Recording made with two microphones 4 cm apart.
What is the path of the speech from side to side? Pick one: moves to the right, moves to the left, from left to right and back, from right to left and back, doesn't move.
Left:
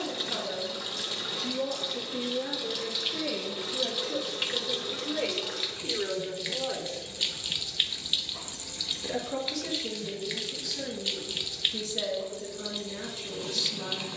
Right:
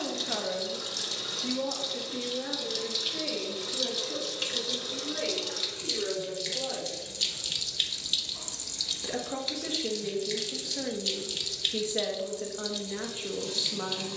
from right to left and back.